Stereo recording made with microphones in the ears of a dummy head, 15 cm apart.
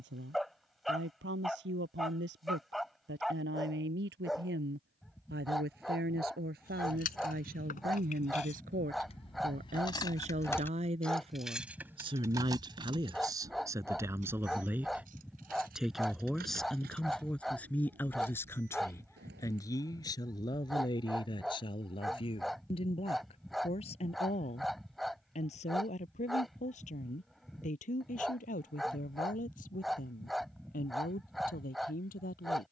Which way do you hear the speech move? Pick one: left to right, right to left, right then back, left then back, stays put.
right to left.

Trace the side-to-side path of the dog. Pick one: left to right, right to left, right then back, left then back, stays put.
stays put.